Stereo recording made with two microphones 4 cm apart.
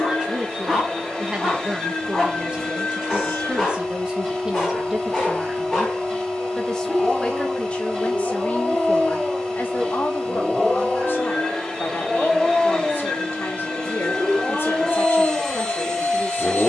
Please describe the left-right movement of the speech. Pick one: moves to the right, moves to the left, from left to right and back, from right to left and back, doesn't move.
moves to the left.